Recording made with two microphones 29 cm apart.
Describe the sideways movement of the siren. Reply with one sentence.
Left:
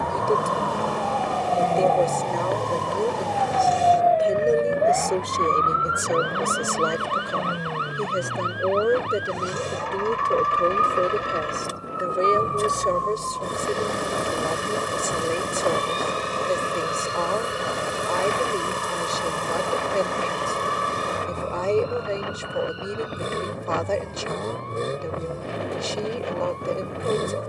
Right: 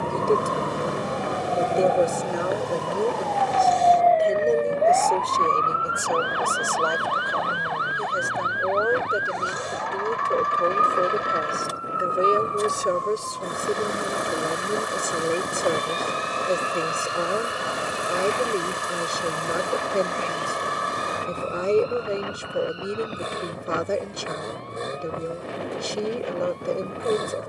In this clip you hear the siren move to the left.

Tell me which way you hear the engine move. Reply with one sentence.
In this clip you hear the engine stay in one place.